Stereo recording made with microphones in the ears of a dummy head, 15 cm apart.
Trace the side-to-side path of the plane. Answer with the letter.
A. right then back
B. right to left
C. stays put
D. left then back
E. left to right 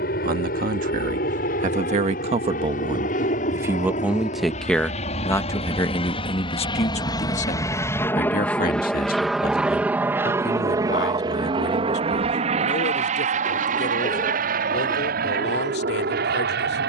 E.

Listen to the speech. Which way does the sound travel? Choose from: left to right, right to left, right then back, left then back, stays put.
right to left.